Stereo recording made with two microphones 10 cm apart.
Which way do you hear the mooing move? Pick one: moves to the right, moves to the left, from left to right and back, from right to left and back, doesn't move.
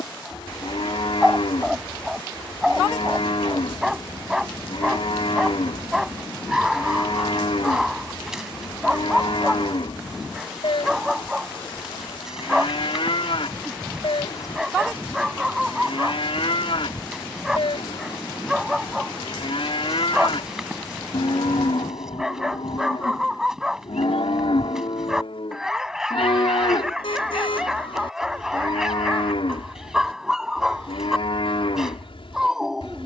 doesn't move.